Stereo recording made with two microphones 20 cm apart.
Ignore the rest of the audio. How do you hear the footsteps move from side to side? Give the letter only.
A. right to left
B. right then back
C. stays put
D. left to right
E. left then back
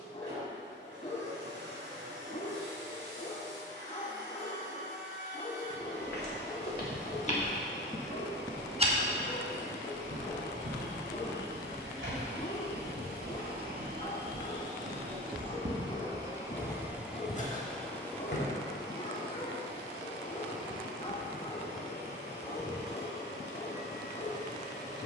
B.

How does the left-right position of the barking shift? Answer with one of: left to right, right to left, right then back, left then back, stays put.
stays put.